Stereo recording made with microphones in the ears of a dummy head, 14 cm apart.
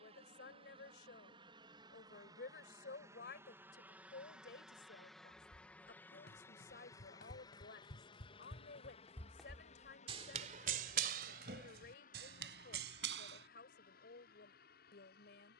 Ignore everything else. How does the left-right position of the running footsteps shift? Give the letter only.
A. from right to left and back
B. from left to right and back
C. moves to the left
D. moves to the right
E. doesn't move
D.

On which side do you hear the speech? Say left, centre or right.
left.